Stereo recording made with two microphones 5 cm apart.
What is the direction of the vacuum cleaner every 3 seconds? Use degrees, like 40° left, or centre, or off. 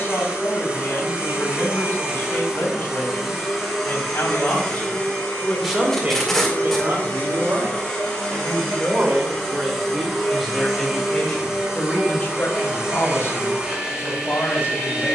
20° right, 10° left, 20° left, centre, 20° right.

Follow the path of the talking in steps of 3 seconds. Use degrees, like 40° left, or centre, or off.
50° left, 30° left, 50° right, centre, 50° left.